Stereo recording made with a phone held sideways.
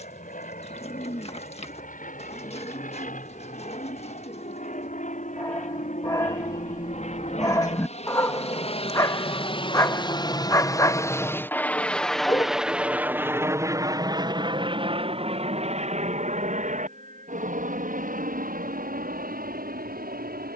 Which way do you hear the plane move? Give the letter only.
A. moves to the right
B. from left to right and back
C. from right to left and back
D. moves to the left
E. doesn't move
A.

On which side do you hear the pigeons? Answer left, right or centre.
left.